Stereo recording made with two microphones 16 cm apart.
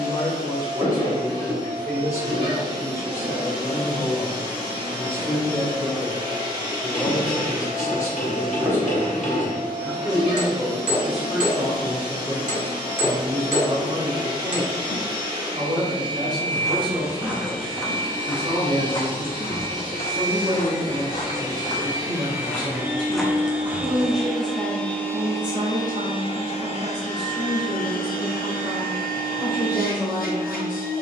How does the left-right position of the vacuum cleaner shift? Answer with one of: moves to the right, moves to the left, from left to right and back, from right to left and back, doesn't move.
moves to the left.